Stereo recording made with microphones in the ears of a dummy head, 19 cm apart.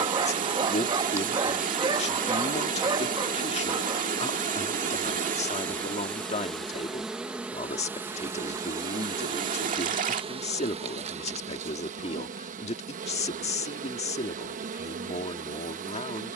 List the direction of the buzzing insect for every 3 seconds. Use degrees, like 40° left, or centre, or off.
10° right, 10° left, 10° right, 30° right, 40° right, 40° right.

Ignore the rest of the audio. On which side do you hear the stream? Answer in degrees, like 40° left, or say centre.
40° right.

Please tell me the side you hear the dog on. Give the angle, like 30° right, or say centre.
20° right.